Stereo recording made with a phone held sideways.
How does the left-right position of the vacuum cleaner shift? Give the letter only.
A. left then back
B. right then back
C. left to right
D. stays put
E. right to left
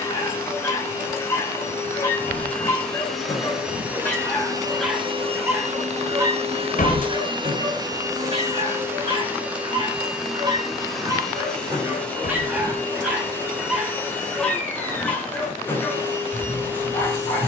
B.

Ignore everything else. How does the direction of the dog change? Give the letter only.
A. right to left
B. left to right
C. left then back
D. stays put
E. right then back
E.